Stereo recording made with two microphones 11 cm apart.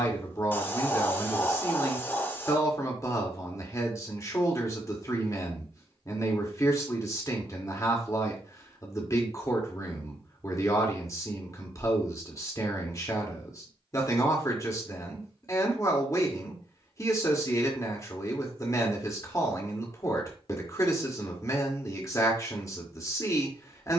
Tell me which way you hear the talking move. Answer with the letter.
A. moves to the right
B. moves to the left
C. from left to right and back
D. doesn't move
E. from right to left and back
D.